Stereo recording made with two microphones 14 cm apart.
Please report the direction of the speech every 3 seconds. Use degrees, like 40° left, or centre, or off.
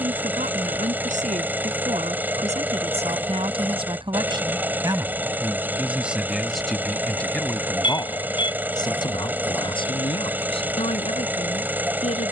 60° right, 30° right, 10° left, 40° left.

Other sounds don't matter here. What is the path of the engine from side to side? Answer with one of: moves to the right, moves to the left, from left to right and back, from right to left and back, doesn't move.
doesn't move.